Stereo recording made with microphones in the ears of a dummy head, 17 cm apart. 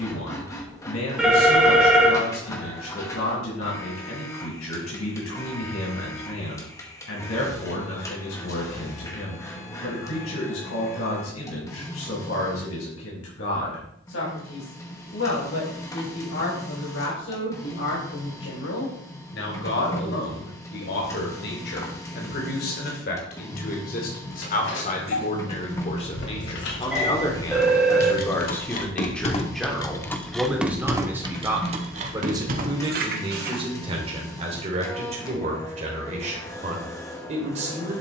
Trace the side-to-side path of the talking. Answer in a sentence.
In this clip you hear the talking travel towards the right.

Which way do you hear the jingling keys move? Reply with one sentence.
You can hear the jingling keys travel towards the right.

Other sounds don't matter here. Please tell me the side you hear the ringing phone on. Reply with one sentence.
In this clip you hear the ringing phone in the centre.